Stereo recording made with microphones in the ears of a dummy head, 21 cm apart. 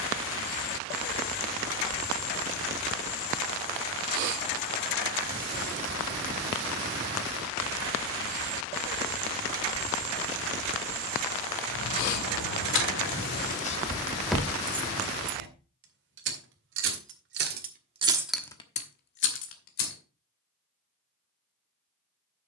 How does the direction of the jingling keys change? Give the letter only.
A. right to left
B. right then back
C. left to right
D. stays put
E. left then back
B.